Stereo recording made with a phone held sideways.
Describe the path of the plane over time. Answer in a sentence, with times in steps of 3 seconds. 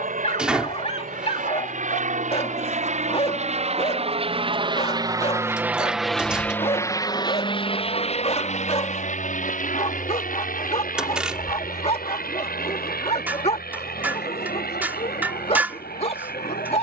In this clip you hear the plane on the right from 0 s and on the left from 6 s.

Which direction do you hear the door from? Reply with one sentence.
In this clip you hear the door in the centre.